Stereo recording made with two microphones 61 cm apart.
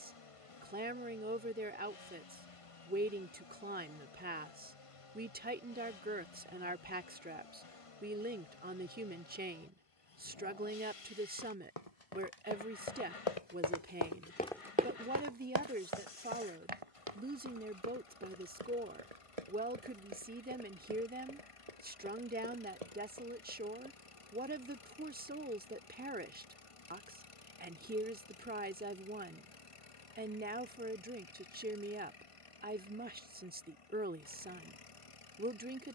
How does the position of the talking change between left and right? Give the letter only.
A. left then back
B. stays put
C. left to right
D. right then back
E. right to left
B.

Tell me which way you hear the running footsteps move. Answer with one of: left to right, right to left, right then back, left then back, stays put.
left to right.